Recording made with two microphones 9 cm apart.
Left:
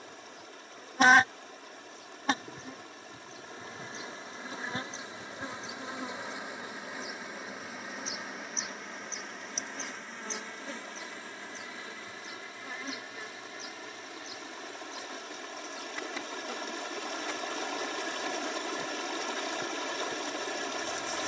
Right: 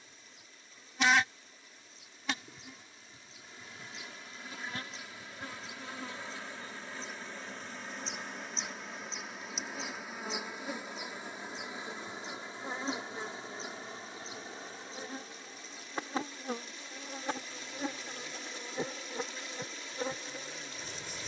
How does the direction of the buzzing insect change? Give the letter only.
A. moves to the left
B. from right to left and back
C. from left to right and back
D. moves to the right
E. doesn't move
D.